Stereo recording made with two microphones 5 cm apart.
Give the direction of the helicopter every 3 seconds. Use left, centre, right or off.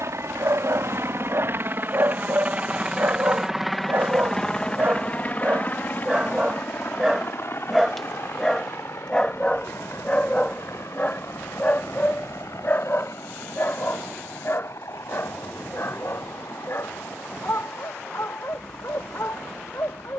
right, centre, left, left, left, left, left.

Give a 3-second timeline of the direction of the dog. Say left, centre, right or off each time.
right, right, centre, left, left, left, left.